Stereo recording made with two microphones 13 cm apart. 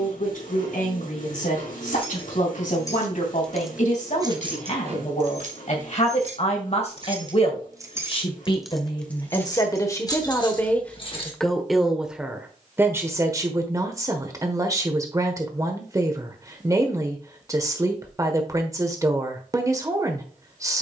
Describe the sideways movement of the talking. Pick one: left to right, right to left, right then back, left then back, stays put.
left to right.